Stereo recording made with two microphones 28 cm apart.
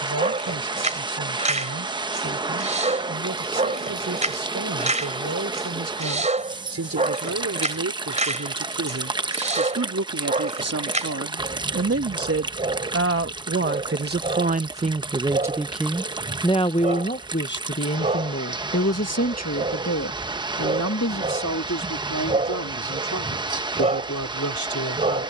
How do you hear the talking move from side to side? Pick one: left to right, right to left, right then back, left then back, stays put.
right to left.